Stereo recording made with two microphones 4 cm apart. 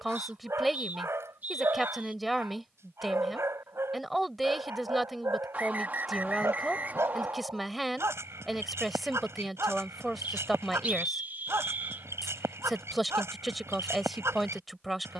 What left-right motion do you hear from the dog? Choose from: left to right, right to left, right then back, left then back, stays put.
stays put.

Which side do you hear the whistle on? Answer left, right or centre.
right.